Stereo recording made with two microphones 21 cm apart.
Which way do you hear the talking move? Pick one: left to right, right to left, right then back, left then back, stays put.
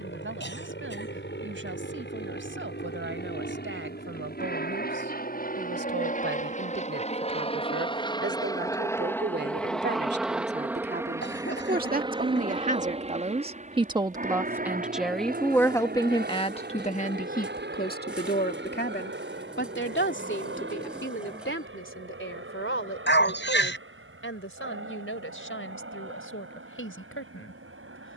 right to left.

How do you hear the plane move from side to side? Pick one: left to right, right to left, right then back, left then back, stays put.
left to right.